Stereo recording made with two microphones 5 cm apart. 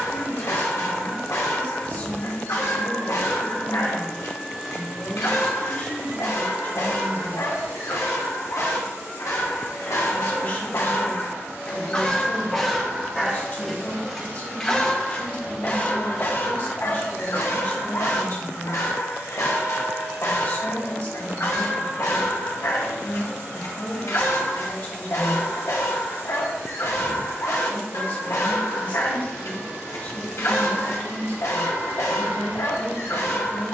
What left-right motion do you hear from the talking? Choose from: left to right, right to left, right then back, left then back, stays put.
stays put.